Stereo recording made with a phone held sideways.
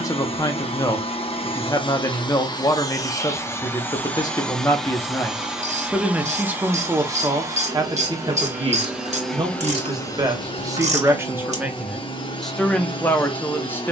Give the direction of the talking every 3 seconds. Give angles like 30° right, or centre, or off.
30° left, 20° left, 30° right, 20° right, 10° left.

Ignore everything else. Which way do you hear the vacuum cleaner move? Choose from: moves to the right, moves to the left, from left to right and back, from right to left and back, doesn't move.
from left to right and back.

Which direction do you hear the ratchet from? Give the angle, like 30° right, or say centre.
60° right.